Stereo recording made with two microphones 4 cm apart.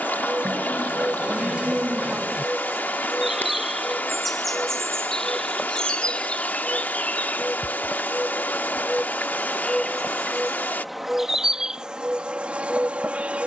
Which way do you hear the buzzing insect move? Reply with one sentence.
In this clip you hear the buzzing insect go left and come back.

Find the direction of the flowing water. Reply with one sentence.
You can hear the flowing water on the left.